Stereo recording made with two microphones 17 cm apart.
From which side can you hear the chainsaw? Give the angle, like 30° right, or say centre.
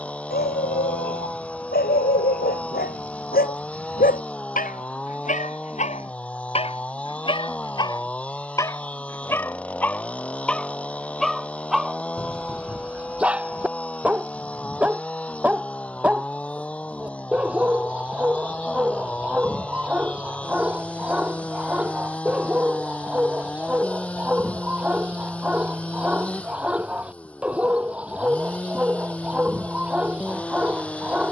10° left.